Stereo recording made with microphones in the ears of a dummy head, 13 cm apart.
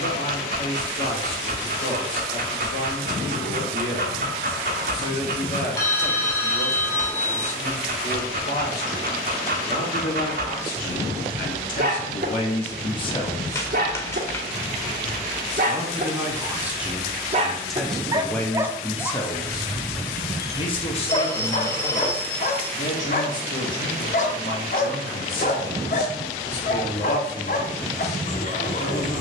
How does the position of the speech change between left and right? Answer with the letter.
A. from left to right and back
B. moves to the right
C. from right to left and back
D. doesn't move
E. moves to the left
A.